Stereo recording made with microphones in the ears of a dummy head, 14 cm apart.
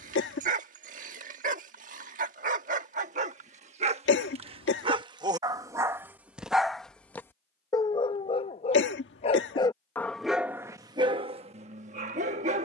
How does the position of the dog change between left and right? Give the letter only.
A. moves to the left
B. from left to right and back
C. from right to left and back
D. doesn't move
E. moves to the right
C.